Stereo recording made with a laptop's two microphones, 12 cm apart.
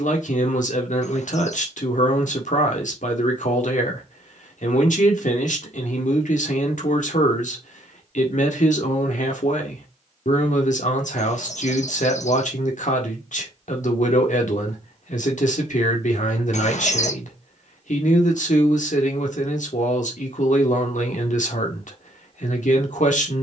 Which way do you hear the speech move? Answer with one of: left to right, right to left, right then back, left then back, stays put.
stays put.